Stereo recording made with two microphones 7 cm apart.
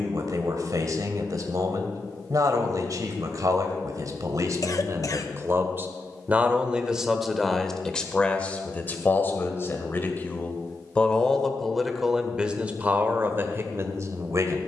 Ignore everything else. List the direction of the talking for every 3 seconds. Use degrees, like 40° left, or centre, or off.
50° right, 50° right, centre, 20° left, 30° right.